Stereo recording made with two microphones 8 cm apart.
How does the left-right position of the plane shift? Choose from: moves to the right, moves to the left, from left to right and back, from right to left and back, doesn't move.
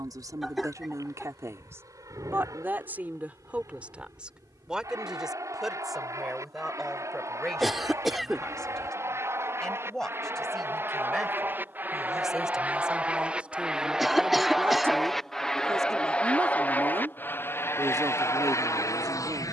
moves to the left.